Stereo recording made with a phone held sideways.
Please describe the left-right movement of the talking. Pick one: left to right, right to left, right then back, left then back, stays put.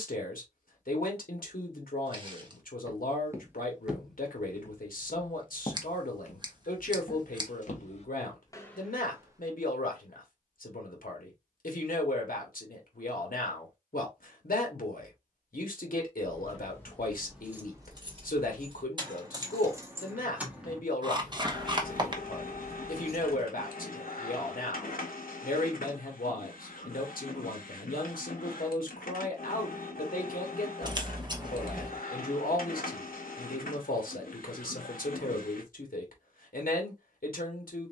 stays put.